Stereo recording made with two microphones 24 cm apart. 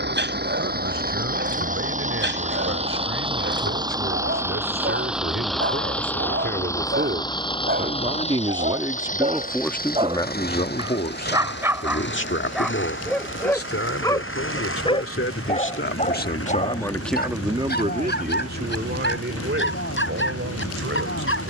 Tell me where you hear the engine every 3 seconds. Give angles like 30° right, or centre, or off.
30° right, 10° right, 20° left, 40° left, 50° left, 60° left, 70° left.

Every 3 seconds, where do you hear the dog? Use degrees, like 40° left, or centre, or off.
50° right, 50° right, 40° right, 20° right, 10° left, 30° left, 50° left.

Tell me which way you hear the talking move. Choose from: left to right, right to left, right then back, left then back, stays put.
left then back.